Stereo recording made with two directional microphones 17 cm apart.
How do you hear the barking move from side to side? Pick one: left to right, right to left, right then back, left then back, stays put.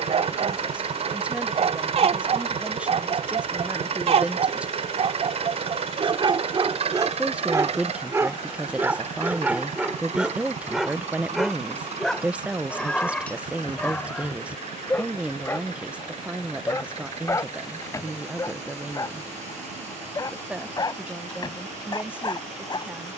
right to left.